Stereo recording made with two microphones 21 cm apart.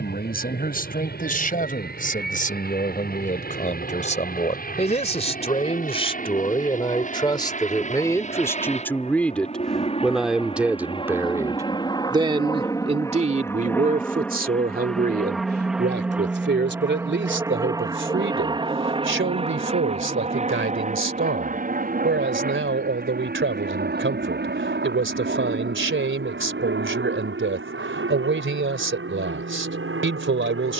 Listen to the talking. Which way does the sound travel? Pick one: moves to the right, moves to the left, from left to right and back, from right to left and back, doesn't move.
moves to the right.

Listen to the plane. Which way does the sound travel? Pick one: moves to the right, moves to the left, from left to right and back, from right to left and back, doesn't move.
moves to the right.